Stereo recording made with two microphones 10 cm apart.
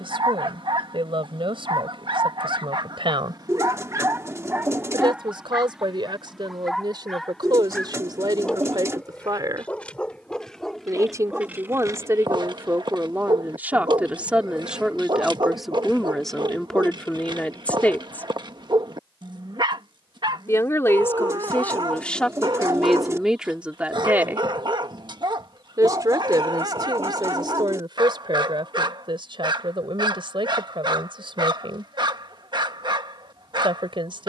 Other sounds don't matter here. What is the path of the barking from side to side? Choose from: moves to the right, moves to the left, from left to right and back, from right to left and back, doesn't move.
from right to left and back.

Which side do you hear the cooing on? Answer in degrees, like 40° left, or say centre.
30° right.